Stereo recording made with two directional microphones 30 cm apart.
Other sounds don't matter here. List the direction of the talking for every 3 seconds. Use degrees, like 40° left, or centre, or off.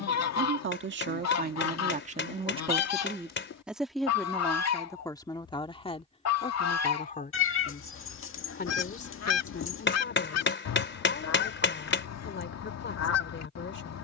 30° right, 10° left, 30° left, 40° left, 40° left.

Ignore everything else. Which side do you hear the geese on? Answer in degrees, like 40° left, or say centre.
60° left.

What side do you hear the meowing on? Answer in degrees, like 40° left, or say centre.
40° left.